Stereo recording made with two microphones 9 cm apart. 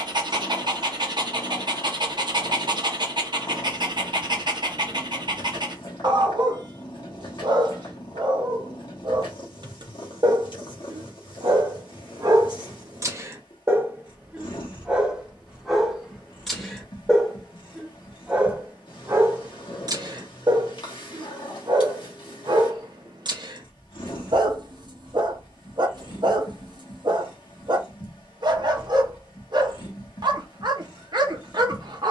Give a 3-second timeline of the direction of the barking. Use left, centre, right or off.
right, right, right, right, right, centre, right, right, right, right, right.